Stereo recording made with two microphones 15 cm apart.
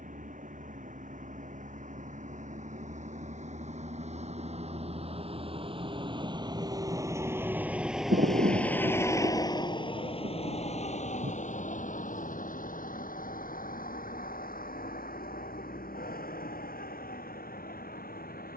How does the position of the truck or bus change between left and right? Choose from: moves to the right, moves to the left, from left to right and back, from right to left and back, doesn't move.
moves to the left.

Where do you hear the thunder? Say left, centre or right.
right.